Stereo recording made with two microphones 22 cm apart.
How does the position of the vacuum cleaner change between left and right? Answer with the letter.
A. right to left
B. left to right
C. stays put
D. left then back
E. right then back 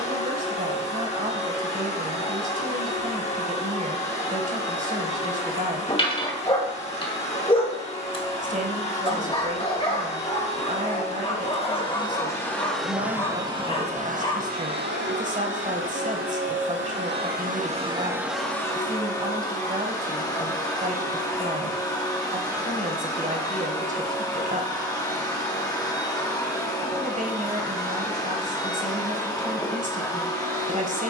E.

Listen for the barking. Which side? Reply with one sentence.
In this clip you hear the barking on the left.